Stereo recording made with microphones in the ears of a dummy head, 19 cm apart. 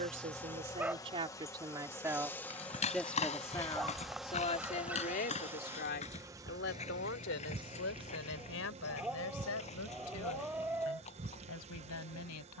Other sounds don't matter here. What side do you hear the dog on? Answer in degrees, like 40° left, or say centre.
10° right.